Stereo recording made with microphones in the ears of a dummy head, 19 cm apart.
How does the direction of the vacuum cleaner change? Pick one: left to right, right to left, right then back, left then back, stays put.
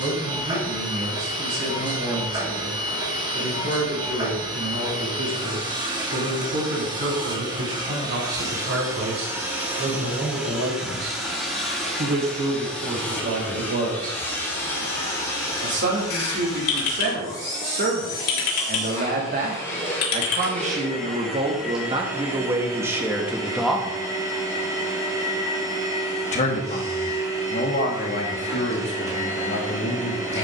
left then back.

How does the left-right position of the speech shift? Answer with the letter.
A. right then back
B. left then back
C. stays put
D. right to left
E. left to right
D.